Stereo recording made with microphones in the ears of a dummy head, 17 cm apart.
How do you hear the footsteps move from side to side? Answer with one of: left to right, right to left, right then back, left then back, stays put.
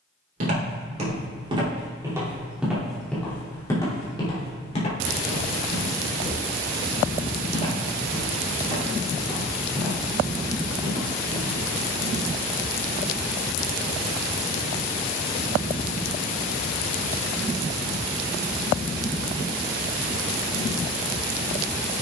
left then back.